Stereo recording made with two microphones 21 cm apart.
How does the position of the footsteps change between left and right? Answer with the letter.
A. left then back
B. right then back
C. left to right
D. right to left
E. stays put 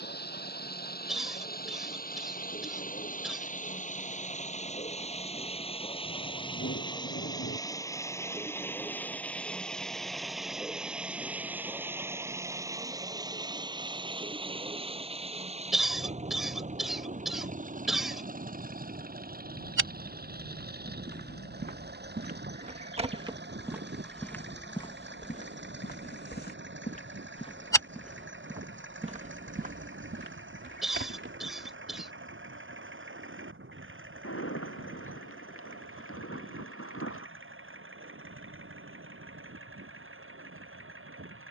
A.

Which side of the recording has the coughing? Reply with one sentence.
In this clip you hear the coughing in the centre.